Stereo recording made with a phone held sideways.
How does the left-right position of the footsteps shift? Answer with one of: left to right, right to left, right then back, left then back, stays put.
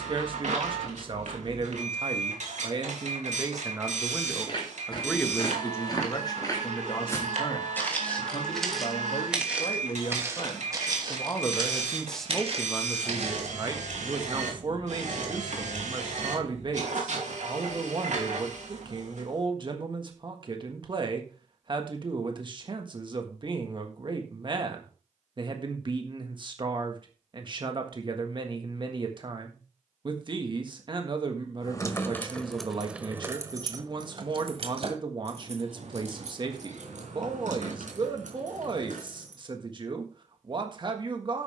left to right.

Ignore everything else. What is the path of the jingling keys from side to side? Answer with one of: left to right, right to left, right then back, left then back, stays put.
left to right.